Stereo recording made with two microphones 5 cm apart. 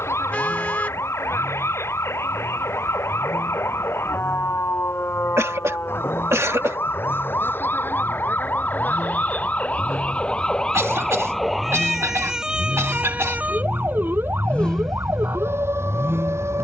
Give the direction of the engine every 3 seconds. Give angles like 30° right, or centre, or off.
80° left, 80° left, 80° left, 70° left, 50° left, 40° right.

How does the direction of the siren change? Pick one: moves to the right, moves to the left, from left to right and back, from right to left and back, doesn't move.
moves to the right.